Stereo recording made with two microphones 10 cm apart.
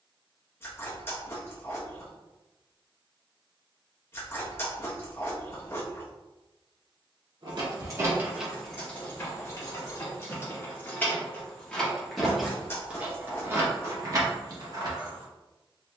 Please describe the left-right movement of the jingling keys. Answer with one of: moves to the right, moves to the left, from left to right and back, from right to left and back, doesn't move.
from right to left and back.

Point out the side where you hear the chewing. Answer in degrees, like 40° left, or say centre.
30° left.